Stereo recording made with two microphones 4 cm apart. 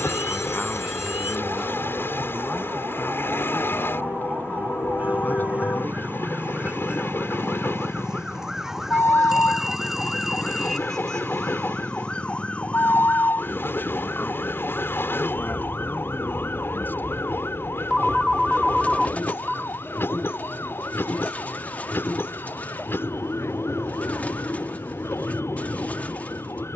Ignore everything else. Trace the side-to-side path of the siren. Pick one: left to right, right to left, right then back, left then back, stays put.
right to left.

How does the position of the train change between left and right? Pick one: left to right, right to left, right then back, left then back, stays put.
stays put.